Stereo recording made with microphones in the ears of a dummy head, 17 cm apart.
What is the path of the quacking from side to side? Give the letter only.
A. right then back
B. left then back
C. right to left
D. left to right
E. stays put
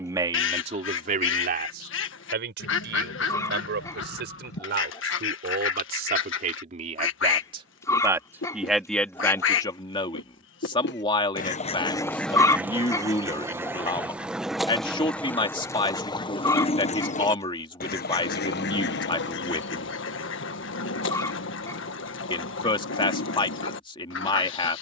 A.